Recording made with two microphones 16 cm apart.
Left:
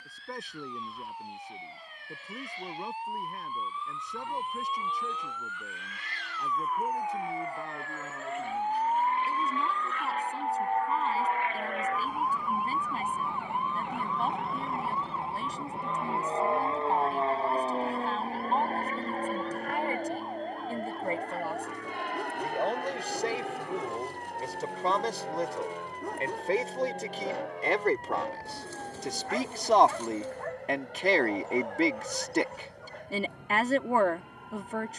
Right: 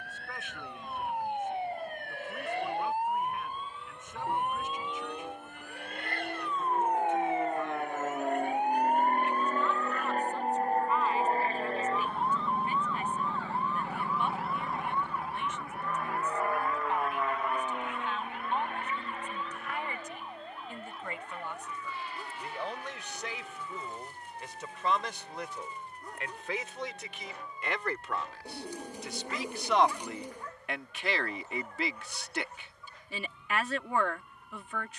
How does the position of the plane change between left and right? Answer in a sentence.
In this clip you hear the plane travel towards the left.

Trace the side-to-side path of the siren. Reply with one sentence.
In this clip you hear the siren move from right to left.